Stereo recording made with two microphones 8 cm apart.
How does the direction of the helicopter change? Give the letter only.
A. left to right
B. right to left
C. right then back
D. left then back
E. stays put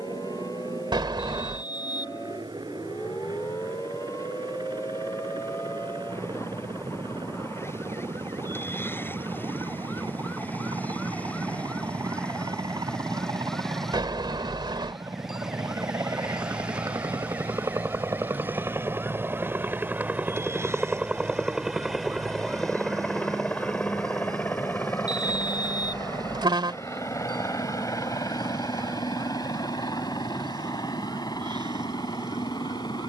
B.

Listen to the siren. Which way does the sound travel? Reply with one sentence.
In this clip you hear the siren move to the right.